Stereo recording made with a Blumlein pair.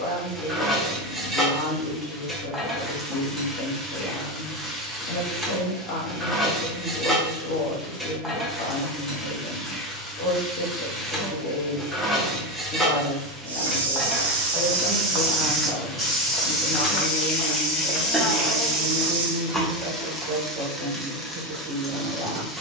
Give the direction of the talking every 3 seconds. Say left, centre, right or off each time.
left, left, left, left, left, centre, right, right.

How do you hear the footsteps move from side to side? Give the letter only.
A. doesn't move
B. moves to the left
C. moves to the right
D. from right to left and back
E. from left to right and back
D.